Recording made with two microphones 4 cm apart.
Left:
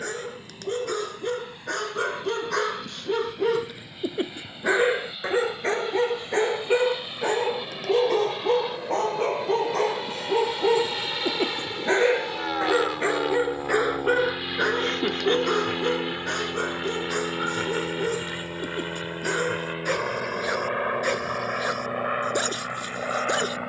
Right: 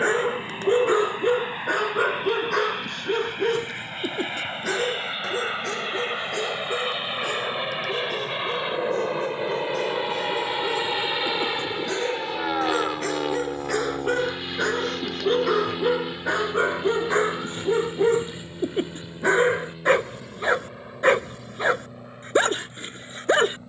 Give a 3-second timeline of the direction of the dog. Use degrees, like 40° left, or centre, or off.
20° right, 20° left, 40° left, 40° left, 20° left, 20° right, 30° right, 30° right.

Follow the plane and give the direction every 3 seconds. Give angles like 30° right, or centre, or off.
60° right, 50° right, 40° right, 20° right, centre, 20° left, 40° left, 50° left.